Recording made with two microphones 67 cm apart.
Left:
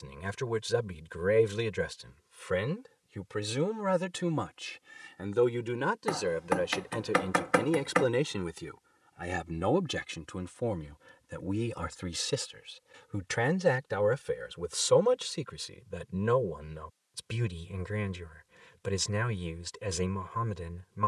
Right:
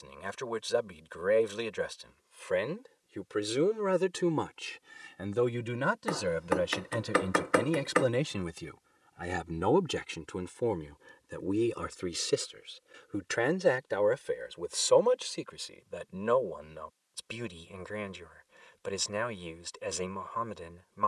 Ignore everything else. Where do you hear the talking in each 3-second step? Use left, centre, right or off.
left, centre, centre, centre, left, left, left.